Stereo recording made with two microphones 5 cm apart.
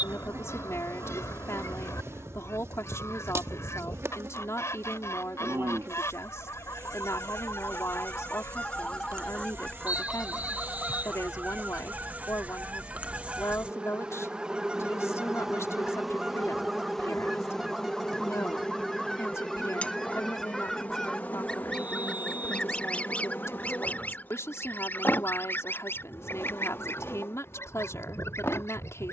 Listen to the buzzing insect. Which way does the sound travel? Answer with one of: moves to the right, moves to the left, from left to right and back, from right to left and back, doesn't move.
moves to the left.